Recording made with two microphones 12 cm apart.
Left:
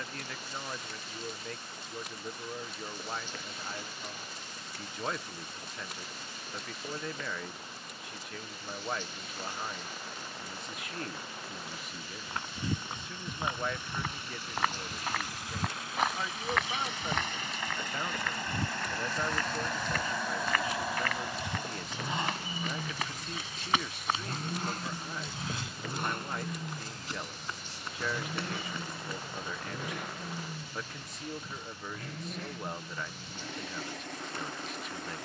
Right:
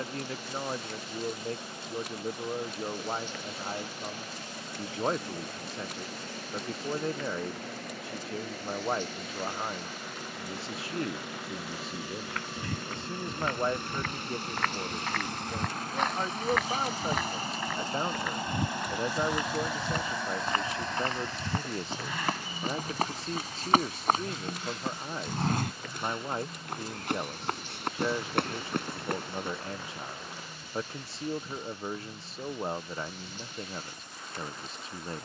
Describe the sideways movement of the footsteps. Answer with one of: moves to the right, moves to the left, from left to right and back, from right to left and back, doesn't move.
moves to the right.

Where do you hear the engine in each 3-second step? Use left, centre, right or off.
right, right, right, right, right, right, centre, left, left, left, left, left.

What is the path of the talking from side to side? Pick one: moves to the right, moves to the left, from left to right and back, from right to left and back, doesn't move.
doesn't move.